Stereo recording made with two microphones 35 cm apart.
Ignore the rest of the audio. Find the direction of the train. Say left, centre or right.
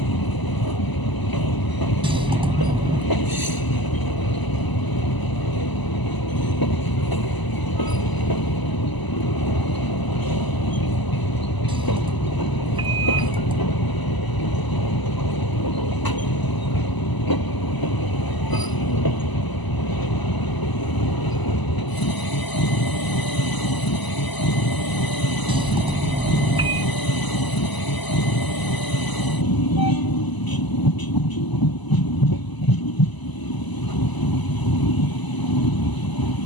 left.